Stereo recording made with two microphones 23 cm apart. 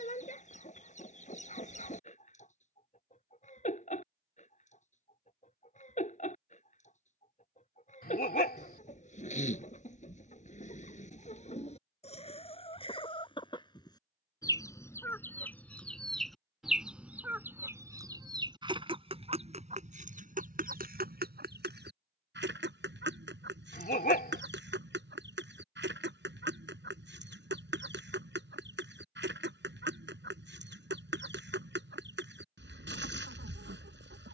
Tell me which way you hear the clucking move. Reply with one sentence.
You can hear the clucking go from the left side to the right.